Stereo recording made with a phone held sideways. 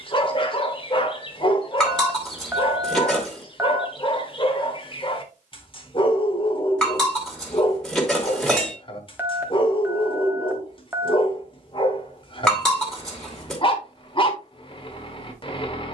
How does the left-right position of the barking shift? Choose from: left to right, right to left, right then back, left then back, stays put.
stays put.